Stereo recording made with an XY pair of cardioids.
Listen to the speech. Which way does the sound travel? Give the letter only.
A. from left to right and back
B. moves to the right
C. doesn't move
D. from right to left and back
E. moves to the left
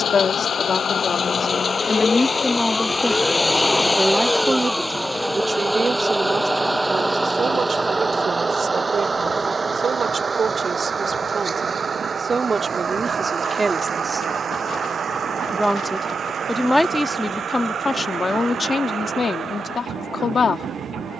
A.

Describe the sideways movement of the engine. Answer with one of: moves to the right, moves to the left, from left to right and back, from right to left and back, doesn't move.
moves to the right.